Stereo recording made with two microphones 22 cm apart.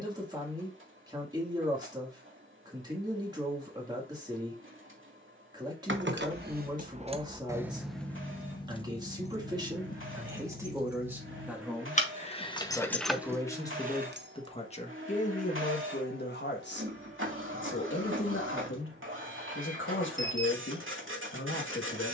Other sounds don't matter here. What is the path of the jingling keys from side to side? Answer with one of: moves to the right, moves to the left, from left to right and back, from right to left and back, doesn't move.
from right to left and back.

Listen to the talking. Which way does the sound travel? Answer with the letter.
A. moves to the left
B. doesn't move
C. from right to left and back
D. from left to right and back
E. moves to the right
A.